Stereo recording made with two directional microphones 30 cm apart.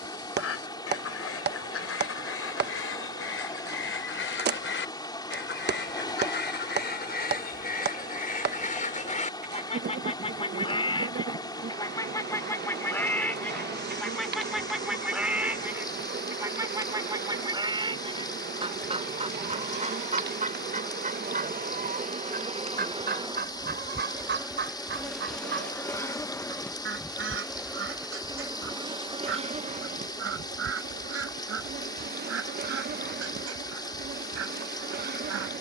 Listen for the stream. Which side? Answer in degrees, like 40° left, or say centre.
10° left.